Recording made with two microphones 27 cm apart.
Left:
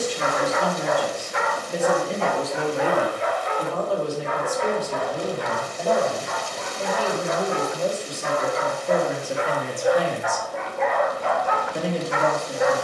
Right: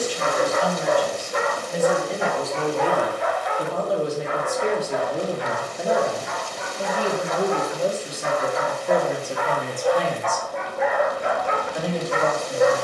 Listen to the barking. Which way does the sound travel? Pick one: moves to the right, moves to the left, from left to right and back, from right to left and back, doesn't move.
from right to left and back.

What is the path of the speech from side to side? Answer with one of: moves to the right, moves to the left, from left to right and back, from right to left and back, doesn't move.
from left to right and back.